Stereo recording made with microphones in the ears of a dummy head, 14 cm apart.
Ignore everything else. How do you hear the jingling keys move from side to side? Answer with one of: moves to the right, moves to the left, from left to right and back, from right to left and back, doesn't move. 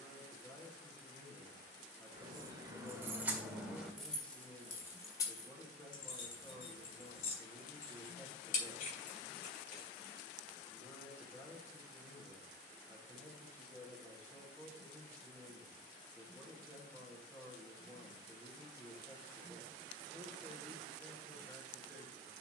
moves to the left.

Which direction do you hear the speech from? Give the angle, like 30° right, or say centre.
10° left.